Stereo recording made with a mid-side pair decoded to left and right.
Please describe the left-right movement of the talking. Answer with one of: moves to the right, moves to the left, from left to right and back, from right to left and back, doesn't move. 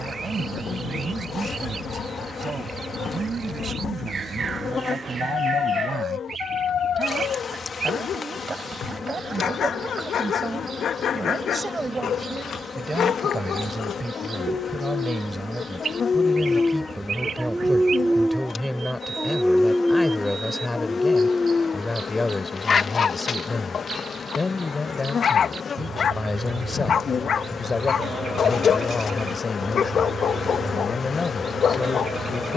moves to the left.